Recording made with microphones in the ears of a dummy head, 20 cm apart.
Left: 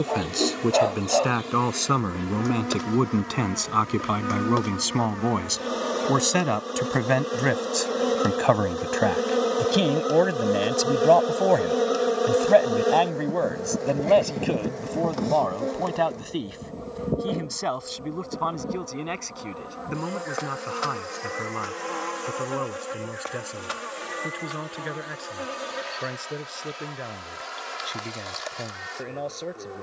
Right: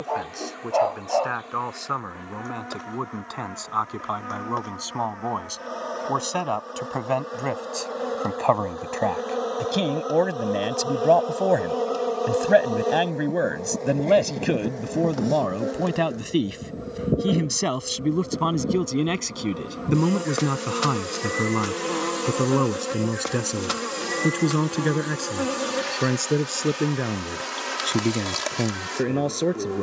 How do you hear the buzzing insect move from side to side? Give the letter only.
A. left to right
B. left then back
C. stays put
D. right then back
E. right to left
A.